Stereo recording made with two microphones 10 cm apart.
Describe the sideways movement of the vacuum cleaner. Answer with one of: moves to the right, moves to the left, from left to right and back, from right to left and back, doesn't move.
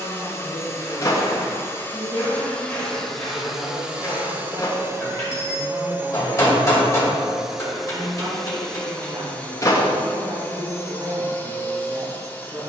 from left to right and back.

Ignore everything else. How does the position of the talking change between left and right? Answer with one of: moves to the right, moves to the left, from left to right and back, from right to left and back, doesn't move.
doesn't move.